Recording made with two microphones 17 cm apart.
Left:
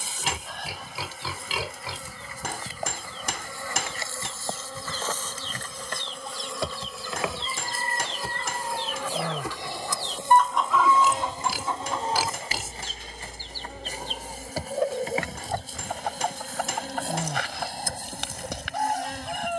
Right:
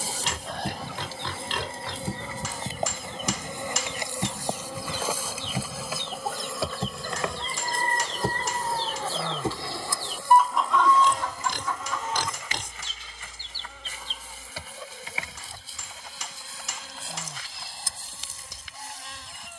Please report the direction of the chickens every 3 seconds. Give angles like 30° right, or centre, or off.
70° right, 60° right, 50° right, centre, 50° left, 70° left, 70° left.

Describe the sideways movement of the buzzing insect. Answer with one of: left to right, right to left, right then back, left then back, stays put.
right to left.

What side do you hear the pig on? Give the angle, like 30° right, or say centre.
10° left.